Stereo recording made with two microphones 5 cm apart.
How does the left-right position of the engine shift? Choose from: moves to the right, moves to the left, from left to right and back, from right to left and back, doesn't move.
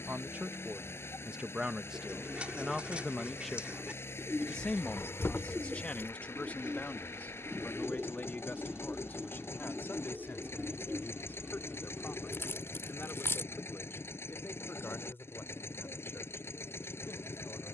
doesn't move.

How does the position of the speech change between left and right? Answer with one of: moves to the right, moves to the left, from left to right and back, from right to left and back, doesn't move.
moves to the left.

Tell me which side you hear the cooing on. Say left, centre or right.
right.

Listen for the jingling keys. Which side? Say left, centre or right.
left.